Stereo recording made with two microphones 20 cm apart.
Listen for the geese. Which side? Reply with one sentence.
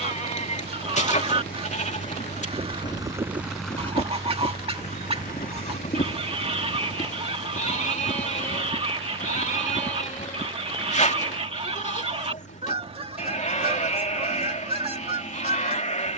You can hear the geese on the right.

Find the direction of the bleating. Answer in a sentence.
You can hear the bleating on the left.